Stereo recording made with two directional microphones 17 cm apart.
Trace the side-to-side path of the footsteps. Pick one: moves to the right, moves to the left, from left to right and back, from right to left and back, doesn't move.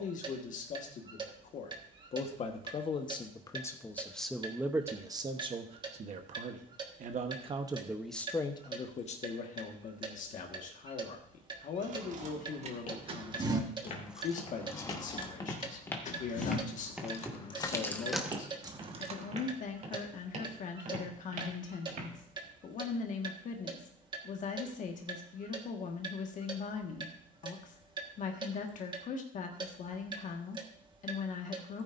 moves to the right.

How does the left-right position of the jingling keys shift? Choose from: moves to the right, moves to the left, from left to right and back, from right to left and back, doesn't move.
from right to left and back.